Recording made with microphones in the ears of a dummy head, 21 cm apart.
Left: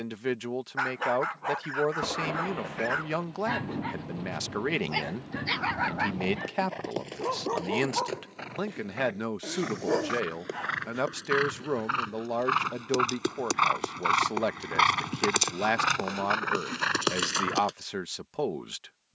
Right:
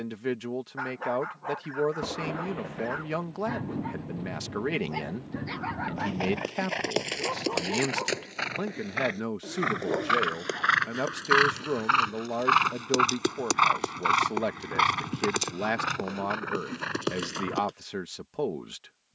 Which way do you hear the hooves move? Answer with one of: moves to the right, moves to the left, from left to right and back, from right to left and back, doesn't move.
moves to the left.